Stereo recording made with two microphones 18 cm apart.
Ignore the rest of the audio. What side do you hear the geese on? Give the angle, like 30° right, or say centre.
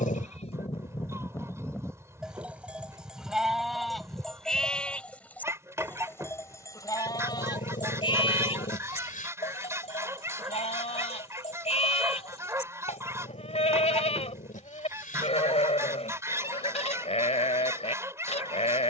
10° right.